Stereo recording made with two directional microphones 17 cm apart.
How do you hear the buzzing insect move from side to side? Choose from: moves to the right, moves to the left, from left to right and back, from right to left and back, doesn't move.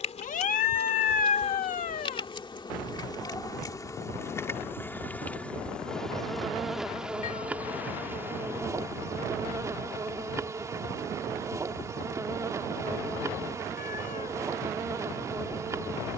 moves to the right.